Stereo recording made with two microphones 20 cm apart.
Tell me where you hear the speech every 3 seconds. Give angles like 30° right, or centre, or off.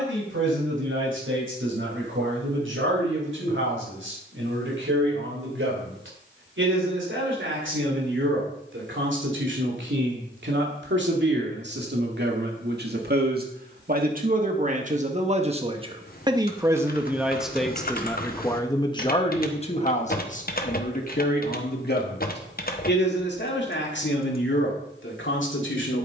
80° right, 70° right, 70° right, 60° right, 50° right, 20° right, 30° left, 50° left, 70° left.